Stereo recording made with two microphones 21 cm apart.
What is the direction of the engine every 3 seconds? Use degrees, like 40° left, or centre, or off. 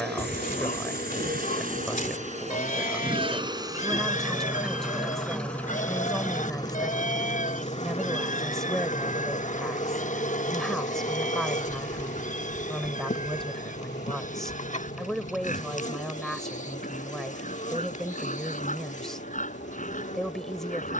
40° right, 10° right, 30° left, 40° left, 50° left, 60° left, 60° left.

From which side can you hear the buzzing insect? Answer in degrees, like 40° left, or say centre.
40° left.